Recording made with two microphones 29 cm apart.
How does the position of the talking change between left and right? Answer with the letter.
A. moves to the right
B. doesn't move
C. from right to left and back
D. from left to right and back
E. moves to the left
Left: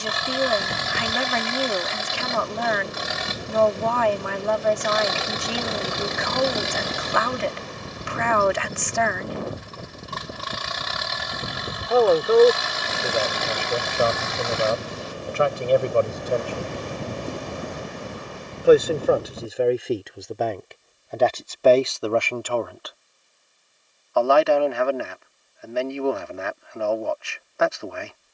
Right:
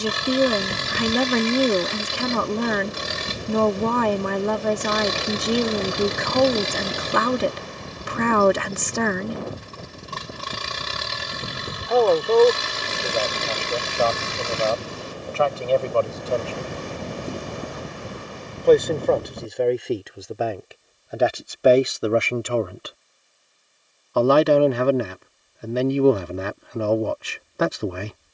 C.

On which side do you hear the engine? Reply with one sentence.
In this clip you hear the engine on the right.